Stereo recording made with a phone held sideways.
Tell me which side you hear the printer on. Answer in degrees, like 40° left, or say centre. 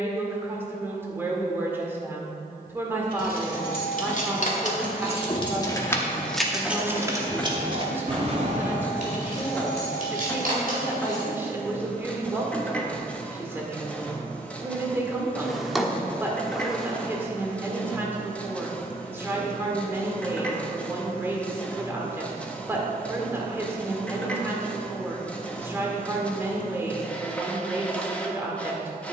10° left.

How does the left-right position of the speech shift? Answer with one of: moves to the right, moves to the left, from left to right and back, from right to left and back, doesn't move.
doesn't move.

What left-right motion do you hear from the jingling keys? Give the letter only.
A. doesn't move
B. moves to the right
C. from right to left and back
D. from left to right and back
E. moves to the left
B.